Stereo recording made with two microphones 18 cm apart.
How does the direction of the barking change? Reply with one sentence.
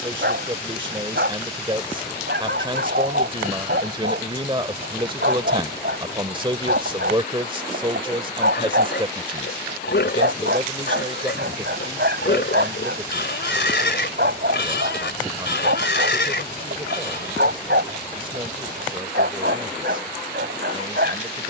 In this clip you hear the barking stay in one place.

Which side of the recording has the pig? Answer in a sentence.
You can hear the pig on the left.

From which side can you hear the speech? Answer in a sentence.
You can hear the speech on the right.